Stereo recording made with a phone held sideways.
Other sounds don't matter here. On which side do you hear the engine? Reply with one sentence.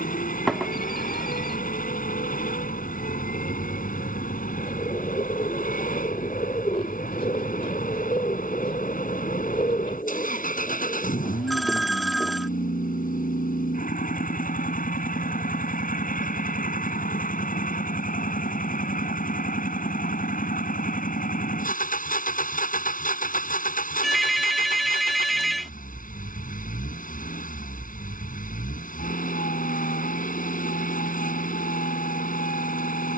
You can hear the engine on the left.